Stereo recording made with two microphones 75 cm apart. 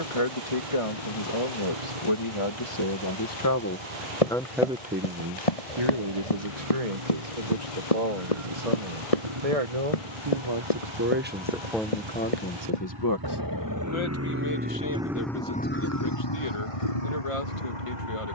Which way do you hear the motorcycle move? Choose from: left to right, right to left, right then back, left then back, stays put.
right to left.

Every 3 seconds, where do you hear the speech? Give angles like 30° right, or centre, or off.
50° left, centre, 60° right, 30° right, 30° left, 50° left.